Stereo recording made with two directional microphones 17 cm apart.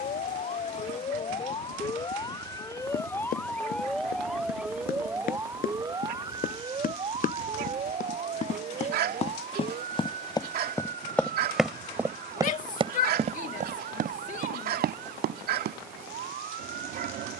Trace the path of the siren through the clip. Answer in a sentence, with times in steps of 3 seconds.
In this clip you hear the siren on the left from 0 s, in the centre from 3 s and on the right from 6 s.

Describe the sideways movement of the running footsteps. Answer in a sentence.
You can hear the running footsteps move to the right.